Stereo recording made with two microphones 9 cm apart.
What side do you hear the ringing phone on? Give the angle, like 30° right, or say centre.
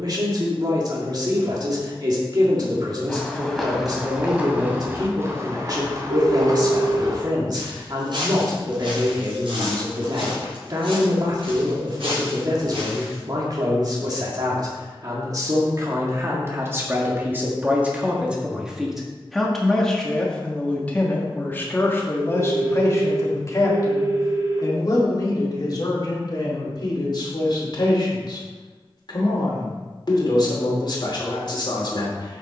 80° right.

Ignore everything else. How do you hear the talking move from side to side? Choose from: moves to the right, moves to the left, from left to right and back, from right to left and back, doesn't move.
moves to the left.